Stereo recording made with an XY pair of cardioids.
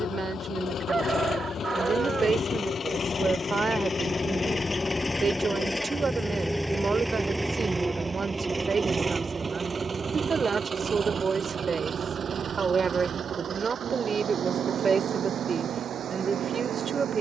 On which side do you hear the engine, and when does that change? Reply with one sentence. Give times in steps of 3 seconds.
In this clip you hear the engine on the left from 0 s, in the centre from 6 s and on the right from 9 s.